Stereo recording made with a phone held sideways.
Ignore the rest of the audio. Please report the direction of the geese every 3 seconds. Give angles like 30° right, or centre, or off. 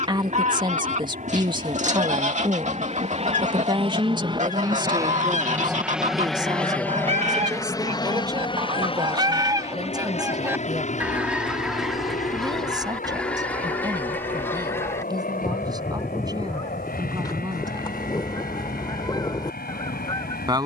50° right, 50° right, 50° right, 20° right, 10° left, 20° left, 30° left.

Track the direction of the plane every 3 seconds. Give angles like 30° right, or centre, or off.
60° right, 30° right, 20° left, 50° left, 60° left, 60° left, 70° left.